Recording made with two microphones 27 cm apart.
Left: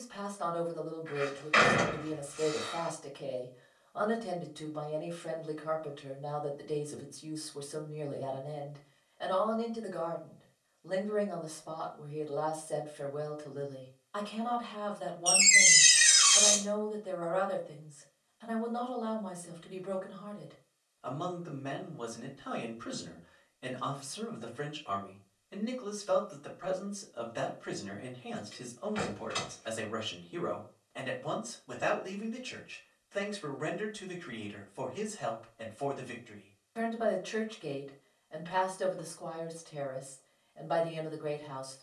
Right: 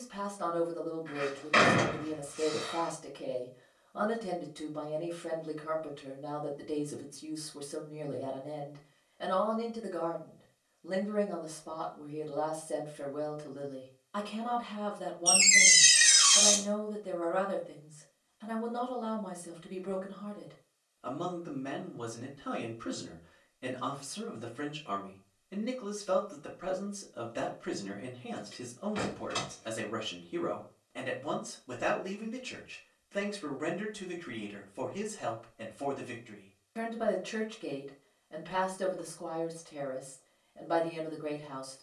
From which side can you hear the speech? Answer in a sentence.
In this clip you hear the speech on the right.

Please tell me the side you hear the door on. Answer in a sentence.
In this clip you hear the door on the right.